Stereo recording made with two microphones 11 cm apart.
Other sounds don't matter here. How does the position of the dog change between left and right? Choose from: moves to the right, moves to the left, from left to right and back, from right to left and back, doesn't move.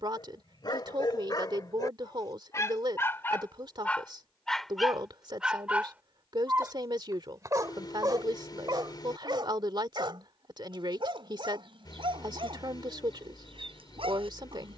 moves to the right.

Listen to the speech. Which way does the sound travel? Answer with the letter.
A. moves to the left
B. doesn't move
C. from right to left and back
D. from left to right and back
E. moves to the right
B.